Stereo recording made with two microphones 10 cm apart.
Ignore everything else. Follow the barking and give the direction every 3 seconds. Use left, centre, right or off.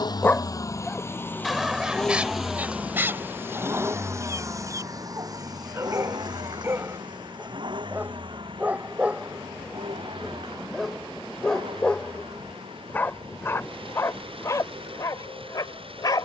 centre, right, right, centre, left, left.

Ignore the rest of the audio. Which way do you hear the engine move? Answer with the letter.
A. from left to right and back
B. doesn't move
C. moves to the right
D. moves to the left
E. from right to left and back
C.